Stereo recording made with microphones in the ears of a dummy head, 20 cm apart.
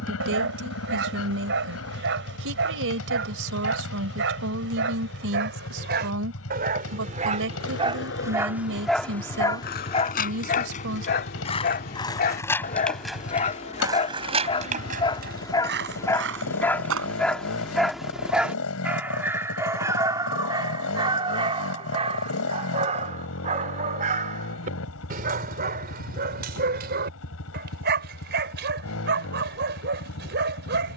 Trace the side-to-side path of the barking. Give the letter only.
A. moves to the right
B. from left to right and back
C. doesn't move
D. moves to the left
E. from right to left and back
E.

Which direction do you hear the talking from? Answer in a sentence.
In this clip you hear the talking on the right.